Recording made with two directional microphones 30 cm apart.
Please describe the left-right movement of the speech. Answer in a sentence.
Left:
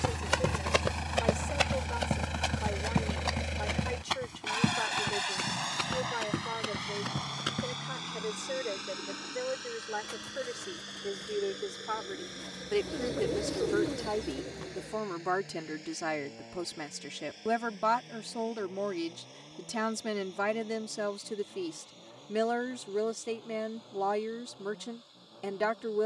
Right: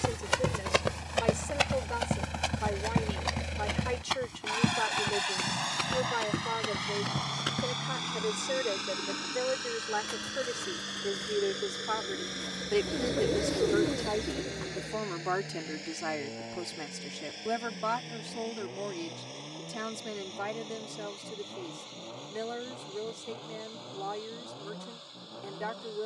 You can hear the speech move to the left.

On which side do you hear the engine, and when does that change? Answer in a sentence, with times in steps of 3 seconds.
In this clip you hear the engine on the left from 0 s, in the centre from 3 s and on the right from 6 s.